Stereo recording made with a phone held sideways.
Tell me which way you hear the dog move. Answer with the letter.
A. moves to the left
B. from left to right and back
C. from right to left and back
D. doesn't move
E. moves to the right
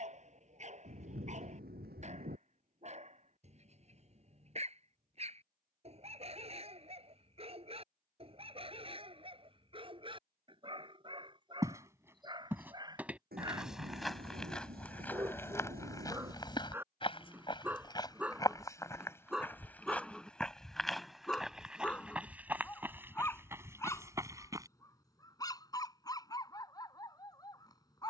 A.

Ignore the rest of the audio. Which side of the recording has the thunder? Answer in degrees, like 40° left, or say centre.
80° right.